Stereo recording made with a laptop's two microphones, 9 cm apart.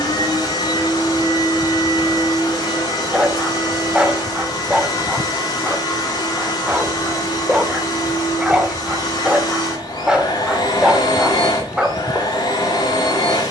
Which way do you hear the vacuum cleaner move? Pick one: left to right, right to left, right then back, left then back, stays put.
stays put.